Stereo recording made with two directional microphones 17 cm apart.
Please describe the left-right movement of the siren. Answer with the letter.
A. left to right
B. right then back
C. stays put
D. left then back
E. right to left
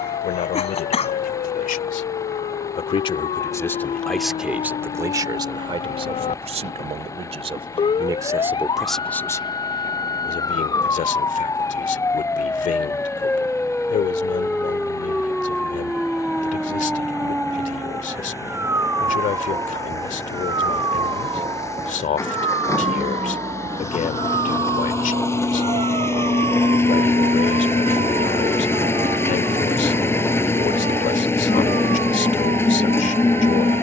A.